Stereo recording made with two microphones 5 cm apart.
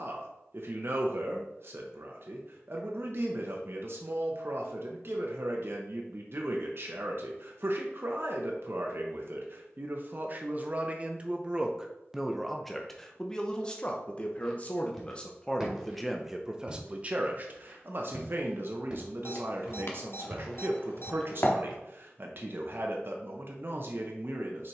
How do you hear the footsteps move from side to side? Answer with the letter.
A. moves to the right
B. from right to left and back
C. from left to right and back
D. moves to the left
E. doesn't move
C.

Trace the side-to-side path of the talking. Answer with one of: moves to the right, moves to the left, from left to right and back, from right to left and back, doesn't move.
from right to left and back.